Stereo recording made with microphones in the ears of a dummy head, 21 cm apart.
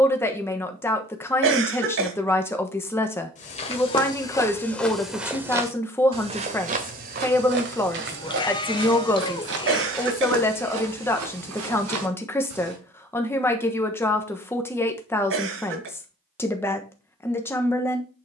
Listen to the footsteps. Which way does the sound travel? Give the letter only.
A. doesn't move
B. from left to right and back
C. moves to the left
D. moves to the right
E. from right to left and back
D.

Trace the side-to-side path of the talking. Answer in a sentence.
In this clip you hear the talking stay put.